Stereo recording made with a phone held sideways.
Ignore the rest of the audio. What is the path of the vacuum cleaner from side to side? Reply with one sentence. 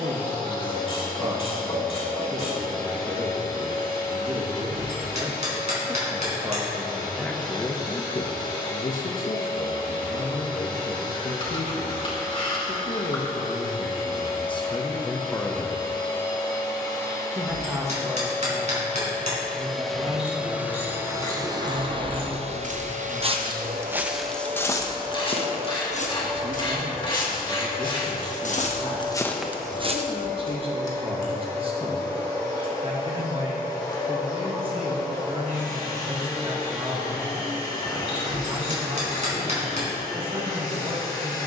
In this clip you hear the vacuum cleaner go right and come back.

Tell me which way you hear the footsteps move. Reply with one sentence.
You can hear the footsteps move from right to left and back again.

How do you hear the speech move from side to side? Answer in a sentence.
In this clip you hear the speech move from right to left and back again.